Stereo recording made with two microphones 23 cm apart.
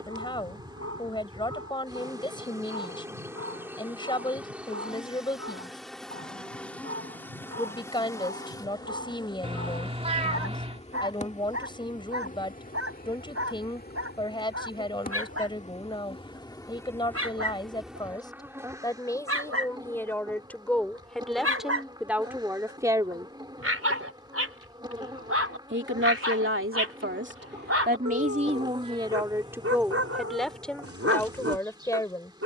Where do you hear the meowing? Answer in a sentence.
You can hear the meowing on the right.